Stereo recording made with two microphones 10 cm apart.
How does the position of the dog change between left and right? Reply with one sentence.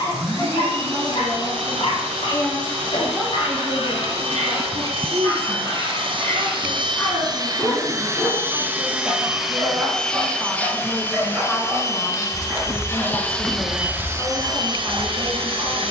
You can hear the dog move to the right.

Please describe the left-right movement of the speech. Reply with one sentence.
You can hear the speech move from left to right and back again.